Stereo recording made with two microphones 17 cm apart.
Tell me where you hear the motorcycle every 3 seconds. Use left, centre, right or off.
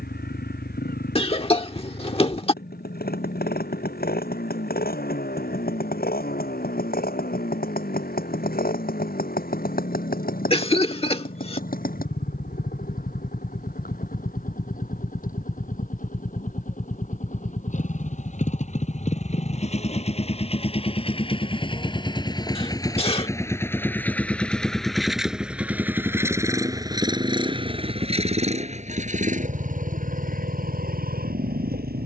left, left, left, left, left, left, left, left, centre, right, right.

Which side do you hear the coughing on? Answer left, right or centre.
left.